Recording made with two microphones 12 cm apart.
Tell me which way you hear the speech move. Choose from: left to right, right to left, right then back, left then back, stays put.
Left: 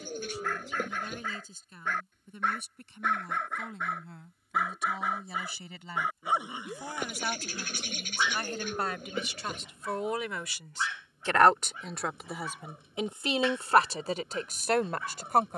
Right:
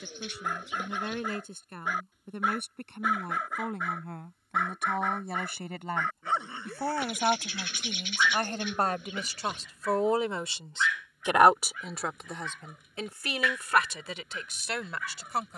right to left.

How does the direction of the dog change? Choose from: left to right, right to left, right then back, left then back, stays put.
right to left.